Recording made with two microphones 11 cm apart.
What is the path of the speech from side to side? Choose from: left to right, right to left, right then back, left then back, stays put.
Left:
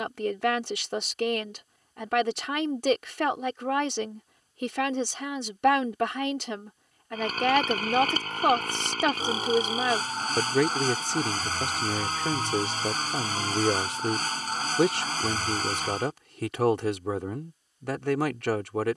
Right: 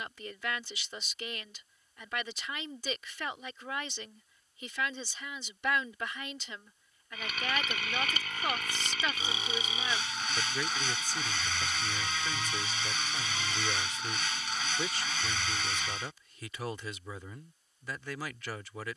stays put.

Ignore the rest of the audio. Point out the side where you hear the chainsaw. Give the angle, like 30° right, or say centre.
40° left.